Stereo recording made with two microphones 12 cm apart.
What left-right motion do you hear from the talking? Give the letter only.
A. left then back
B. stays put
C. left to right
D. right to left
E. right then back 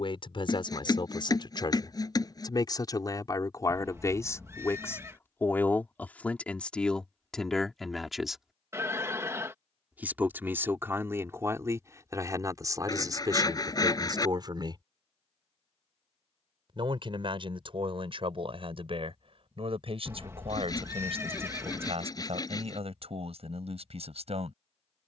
C.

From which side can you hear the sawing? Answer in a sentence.
In this clip you hear the sawing on the left.